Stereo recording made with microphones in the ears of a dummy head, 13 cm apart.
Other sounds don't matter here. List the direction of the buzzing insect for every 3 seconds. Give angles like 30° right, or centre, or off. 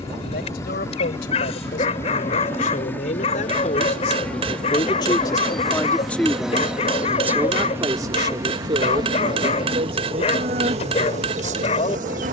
20° left, 10° left, 10° right, 40° right.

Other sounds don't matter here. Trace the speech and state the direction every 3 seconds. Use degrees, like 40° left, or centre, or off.
70° left, 40° left, 20° right, 50° right.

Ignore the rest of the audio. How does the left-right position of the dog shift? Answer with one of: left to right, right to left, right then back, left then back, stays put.
stays put.